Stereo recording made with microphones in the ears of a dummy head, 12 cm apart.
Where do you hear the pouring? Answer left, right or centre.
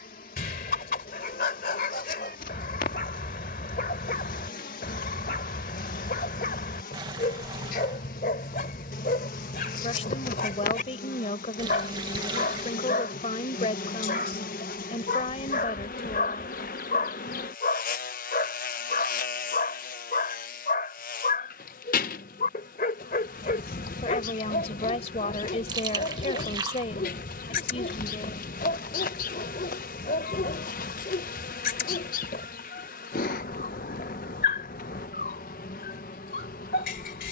right.